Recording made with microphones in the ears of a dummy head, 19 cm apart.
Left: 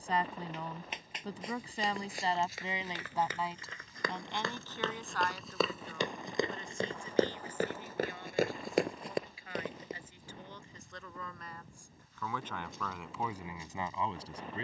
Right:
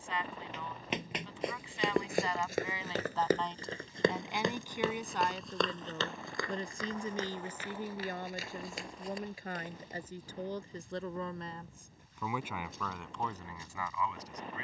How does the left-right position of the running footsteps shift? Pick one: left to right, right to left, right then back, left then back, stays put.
right to left.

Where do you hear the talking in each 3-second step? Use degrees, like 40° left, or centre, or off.
30° left, 10° right, 40° right, 30° right, 10° left.